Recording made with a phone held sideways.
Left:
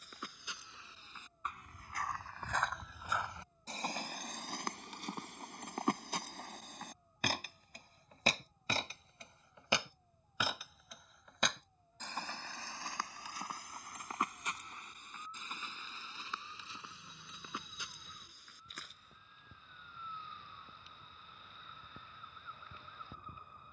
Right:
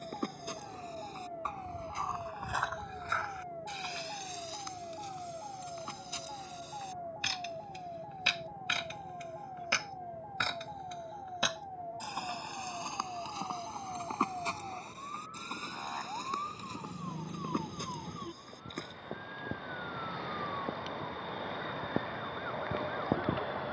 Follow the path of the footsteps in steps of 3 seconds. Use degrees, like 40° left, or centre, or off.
30° right, 50° left, 50° left, 10° left, 20° right, 40° right, 50° right, off.